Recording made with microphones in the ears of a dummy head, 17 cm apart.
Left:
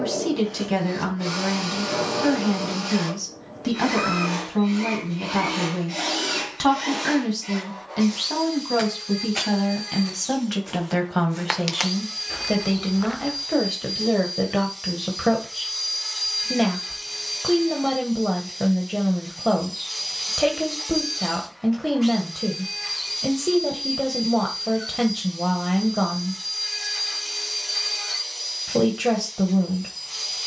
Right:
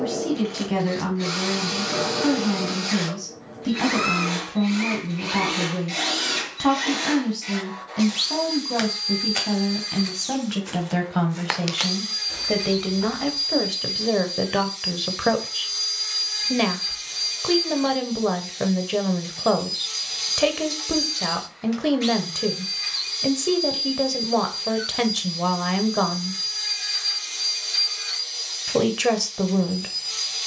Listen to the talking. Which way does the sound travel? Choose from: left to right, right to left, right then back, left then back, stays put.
left to right.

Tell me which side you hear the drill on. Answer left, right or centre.
right.